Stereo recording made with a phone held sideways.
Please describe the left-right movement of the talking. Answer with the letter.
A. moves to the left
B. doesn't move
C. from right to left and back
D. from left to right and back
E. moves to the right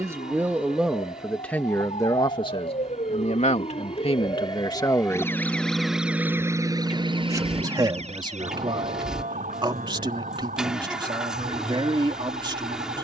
C.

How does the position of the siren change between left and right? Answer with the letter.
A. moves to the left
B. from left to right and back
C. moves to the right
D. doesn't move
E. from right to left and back
C.